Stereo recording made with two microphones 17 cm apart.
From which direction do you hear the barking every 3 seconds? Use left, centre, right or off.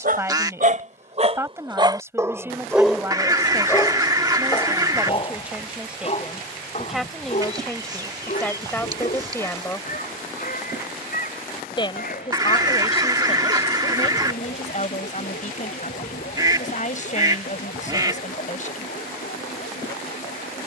right, left, left, left, left, left, left.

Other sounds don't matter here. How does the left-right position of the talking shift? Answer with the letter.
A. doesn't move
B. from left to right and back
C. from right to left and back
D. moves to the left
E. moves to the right
D.